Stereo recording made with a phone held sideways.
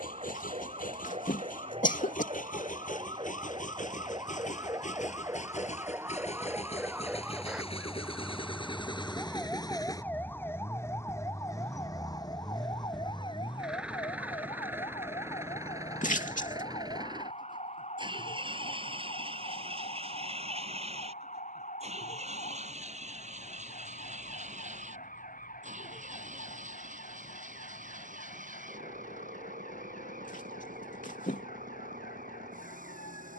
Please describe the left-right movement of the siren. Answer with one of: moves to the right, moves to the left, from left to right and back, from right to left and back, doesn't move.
moves to the left.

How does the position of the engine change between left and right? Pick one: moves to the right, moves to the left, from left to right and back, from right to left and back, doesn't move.
moves to the right.